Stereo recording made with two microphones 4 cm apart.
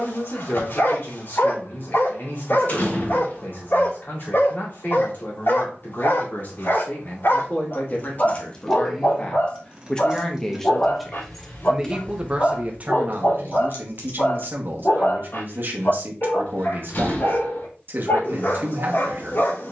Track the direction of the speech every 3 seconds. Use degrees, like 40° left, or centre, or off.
50° left, 50° left, 50° left, 10° left, 50° right, 50° right, 50° right.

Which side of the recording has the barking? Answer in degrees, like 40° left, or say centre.
70° left.